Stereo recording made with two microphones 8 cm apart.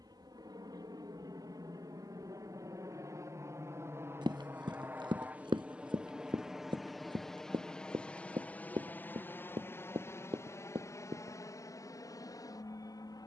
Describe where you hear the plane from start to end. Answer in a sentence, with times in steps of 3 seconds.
In this clip you hear the plane on the right from 0 s, in the centre from 6 s and on the left from 9 s.